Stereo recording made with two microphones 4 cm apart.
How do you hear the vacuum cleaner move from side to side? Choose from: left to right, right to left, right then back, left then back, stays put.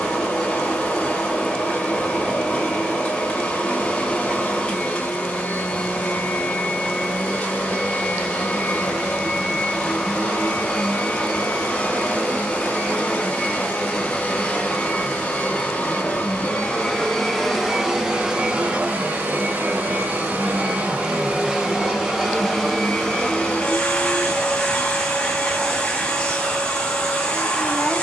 right then back.